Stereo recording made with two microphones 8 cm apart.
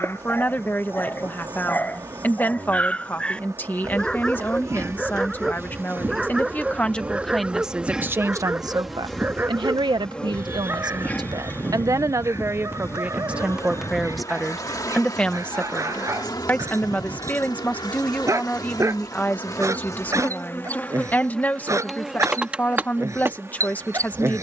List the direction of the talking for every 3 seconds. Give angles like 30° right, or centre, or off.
20° left, 20° left, 10° right, 60° right, 10° right, 20° left, 20° left, 20° left.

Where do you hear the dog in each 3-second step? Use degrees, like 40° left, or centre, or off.
20° left, 10° left, 10° right, 30° right, 40° right, 40° right, 40° right, 40° right.